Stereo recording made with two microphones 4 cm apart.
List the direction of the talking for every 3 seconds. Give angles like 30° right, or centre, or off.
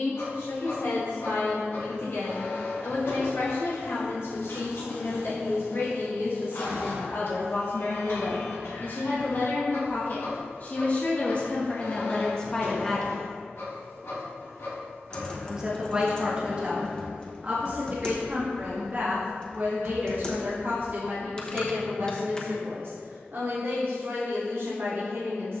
70° left, 70° left, 60° left, 40° left, 20° left, 30° right, 50° right, 60° right, 60° right.